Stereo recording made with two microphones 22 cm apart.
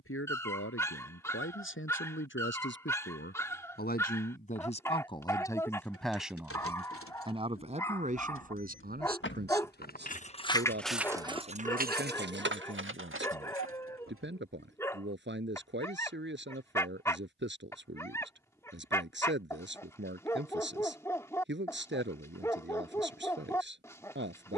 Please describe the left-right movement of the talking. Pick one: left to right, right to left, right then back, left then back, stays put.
left to right.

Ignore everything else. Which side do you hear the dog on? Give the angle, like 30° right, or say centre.
10° left.